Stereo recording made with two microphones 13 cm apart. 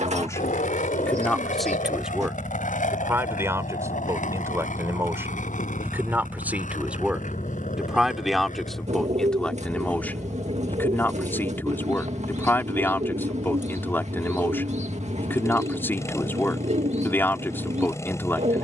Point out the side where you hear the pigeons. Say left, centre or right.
right.